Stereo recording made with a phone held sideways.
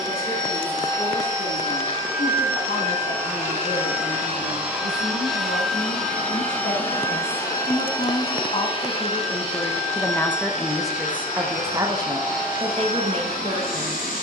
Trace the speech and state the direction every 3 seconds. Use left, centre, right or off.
left, left, left, centre, right.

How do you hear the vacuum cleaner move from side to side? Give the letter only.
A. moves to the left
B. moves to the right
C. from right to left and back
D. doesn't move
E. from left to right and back
A.